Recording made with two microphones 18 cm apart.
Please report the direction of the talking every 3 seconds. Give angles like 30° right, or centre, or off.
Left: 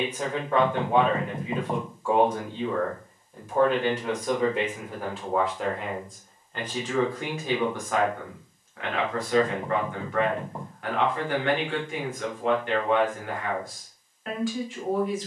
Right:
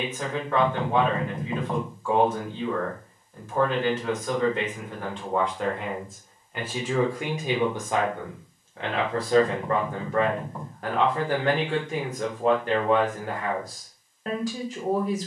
10° left, 10° left, 20° right, 40° right, 40° right.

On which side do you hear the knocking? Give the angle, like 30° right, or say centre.
30° left.